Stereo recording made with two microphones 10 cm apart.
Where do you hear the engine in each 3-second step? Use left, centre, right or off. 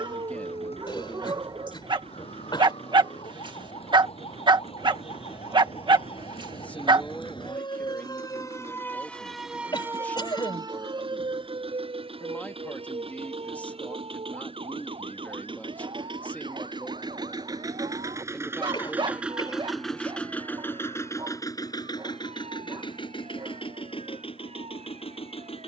right, right, right, right, right, right, centre, left, left.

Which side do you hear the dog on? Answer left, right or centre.
right.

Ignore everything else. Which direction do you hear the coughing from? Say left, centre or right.
left.